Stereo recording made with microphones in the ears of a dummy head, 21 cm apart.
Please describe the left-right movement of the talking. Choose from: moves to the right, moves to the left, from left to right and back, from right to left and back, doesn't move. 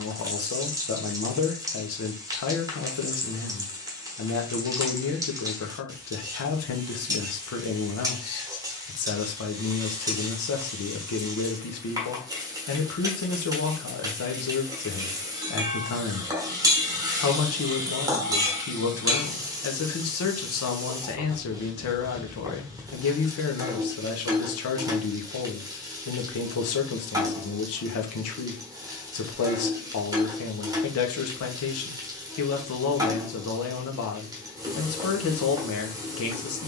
doesn't move.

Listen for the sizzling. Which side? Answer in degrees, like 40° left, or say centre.
10° right.